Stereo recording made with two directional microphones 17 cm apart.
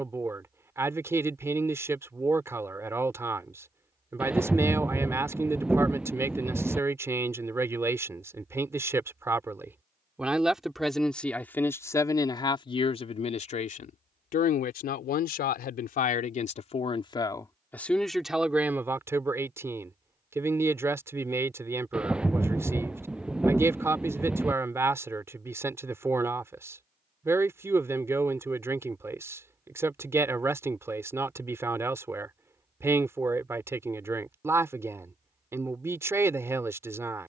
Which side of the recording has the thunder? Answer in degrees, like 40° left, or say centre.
10° right.